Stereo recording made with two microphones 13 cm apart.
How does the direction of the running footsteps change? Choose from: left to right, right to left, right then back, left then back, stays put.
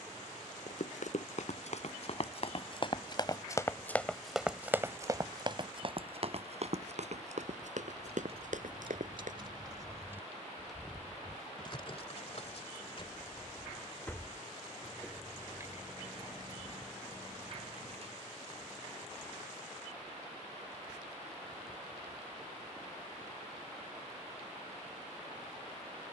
left to right.